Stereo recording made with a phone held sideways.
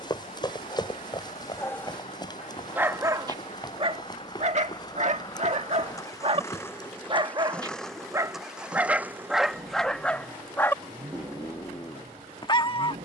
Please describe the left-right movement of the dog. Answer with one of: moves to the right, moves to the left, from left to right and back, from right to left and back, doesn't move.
from left to right and back.